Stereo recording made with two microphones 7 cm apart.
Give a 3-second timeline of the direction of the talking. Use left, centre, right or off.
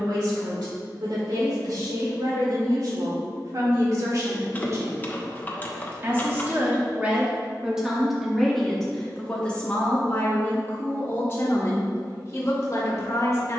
right, right, centre, left, left.